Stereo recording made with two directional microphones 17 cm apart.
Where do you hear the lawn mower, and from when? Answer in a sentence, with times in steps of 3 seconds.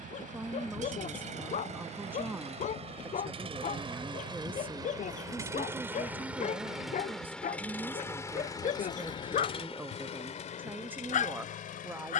In this clip you hear the lawn mower on the right from 0 s, in the centre from 6 s and on the left from 9 s.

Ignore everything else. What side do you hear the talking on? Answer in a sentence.
In this clip you hear the talking in the centre.